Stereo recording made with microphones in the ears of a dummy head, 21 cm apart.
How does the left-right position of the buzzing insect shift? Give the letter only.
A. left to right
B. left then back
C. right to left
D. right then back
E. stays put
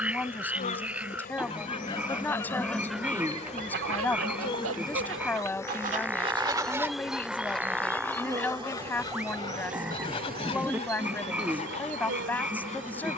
A.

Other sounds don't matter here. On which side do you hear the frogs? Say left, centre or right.
centre.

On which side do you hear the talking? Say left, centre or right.
centre.